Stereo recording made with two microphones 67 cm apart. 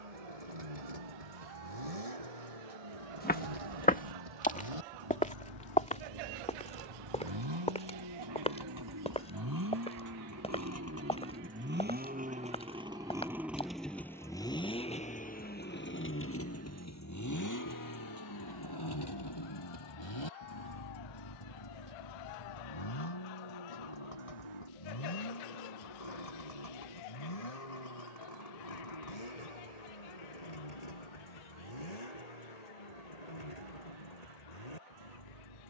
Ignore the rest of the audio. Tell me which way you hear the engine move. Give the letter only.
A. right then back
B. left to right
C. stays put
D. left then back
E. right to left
E.